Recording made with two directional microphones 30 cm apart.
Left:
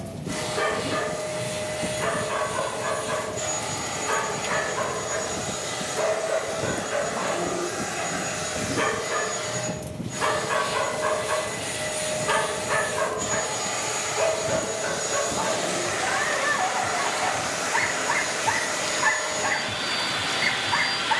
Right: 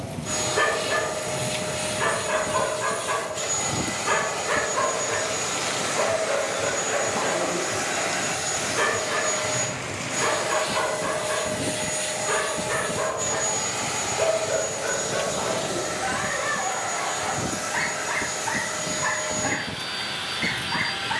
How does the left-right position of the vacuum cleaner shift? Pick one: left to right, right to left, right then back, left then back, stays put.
right to left.